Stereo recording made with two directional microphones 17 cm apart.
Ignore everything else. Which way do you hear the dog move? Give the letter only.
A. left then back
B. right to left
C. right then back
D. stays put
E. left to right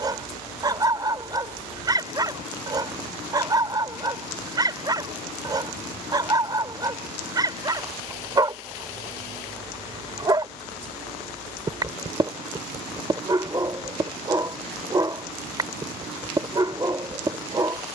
D.